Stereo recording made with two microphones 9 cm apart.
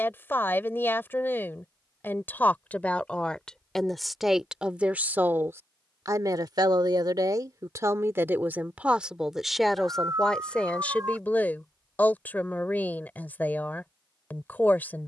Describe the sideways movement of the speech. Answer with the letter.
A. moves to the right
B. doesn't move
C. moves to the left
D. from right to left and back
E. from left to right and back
E.